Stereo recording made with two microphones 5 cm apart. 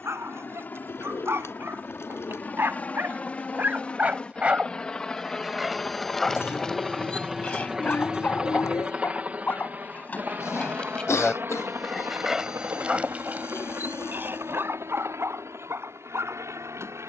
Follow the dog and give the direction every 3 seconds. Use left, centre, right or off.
right, right, left, left, right, right.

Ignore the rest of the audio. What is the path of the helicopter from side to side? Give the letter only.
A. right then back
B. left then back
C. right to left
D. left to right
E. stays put
D.